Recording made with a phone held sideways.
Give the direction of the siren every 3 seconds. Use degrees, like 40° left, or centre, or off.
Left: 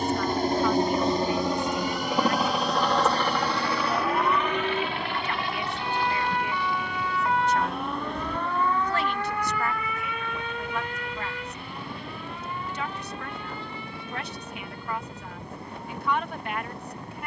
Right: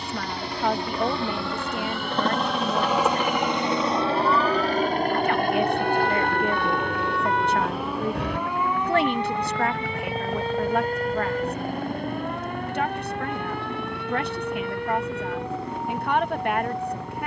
40° left, 30° left, centre, 30° right, 60° right, 70° right.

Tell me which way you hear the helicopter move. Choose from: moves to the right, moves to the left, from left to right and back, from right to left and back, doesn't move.
moves to the right.